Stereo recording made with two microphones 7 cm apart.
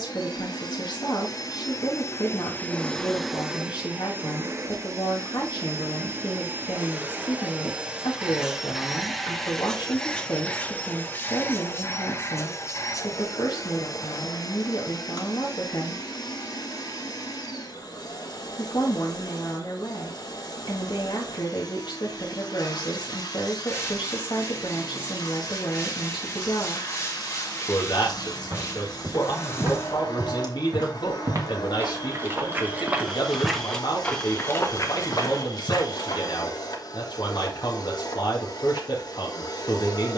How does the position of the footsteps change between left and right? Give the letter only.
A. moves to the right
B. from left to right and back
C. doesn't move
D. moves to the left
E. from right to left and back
D.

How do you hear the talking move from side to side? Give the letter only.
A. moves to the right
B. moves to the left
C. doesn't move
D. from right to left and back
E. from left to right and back
C.